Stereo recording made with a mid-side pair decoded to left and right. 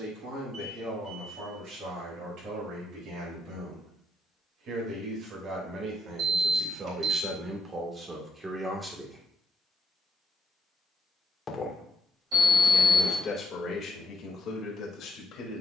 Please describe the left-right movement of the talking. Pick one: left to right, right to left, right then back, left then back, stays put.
right to left.